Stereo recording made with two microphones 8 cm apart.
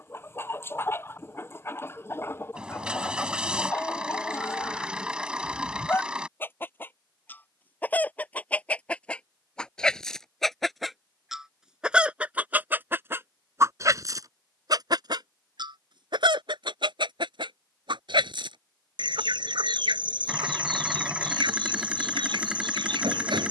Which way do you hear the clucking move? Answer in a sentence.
You can hear the clucking move from left to right.